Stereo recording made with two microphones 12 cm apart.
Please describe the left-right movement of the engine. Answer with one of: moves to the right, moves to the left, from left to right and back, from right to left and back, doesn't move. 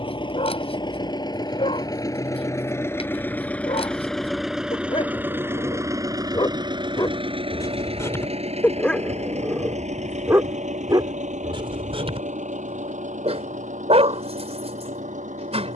moves to the right.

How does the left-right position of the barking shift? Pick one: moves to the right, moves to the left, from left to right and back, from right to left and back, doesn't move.
moves to the right.